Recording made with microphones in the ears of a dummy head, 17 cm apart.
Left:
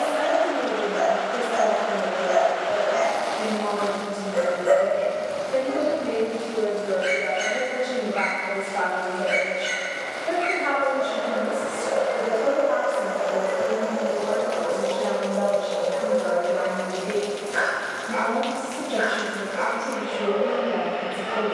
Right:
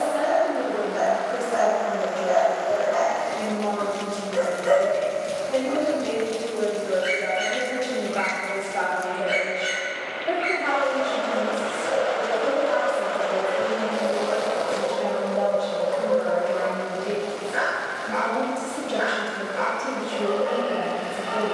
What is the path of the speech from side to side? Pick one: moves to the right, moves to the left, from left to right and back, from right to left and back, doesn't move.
from right to left and back.